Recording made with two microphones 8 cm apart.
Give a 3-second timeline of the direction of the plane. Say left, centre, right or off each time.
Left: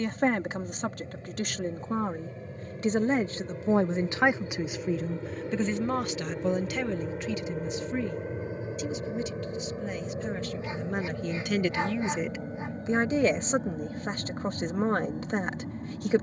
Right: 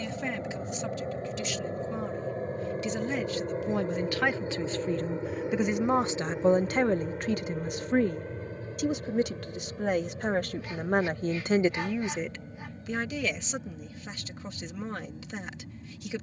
right, right, centre, left, left, left.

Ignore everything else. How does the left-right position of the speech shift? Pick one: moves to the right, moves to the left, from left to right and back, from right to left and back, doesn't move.
from left to right and back.